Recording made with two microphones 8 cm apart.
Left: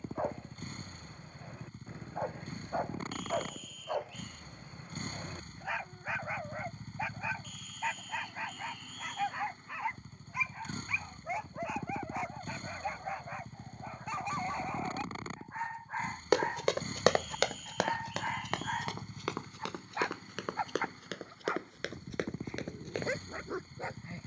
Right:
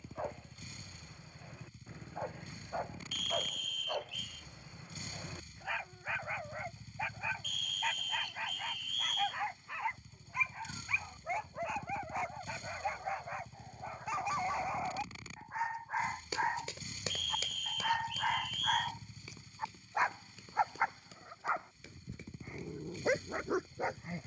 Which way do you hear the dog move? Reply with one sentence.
You can hear the dog travel towards the right.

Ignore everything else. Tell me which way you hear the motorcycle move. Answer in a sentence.
You can hear the motorcycle stay put.